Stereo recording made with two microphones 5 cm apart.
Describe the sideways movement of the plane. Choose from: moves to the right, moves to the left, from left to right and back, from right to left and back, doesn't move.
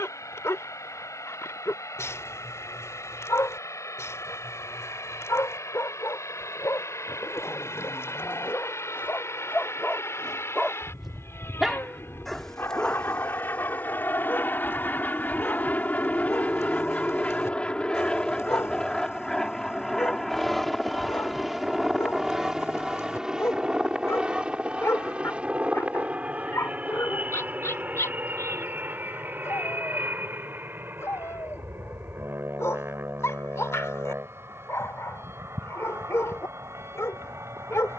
moves to the right.